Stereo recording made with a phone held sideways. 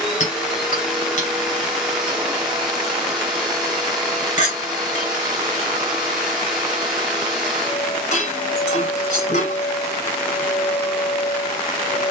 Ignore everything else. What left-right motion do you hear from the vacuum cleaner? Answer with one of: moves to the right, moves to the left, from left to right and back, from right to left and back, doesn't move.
doesn't move.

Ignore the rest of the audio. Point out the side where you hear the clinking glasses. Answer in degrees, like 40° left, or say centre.
50° left.